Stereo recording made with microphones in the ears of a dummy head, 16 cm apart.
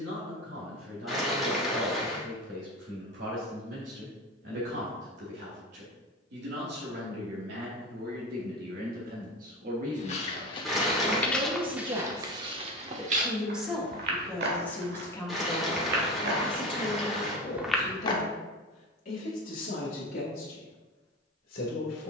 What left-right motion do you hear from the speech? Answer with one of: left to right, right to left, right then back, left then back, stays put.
right to left.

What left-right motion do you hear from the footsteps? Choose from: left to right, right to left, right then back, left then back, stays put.
right then back.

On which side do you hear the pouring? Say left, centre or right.
centre.